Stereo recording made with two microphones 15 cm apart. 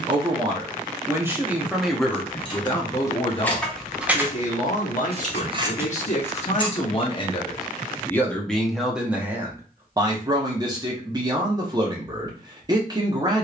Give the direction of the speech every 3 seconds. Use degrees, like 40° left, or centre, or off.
10° right, 50° left, 20° left, 20° right, 30° right.